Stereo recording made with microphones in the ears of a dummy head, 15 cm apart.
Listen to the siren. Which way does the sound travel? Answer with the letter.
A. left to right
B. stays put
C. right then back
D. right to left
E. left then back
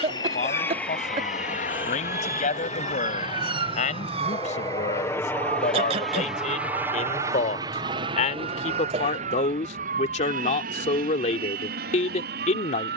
A.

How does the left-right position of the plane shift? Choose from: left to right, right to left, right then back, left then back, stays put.
left to right.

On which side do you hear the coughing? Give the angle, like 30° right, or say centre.
40° right.